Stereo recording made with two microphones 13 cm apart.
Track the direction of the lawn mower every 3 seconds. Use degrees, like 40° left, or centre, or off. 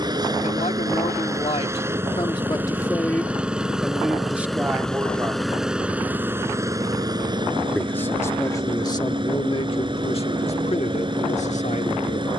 20° right, centre, 30° right, 40° right.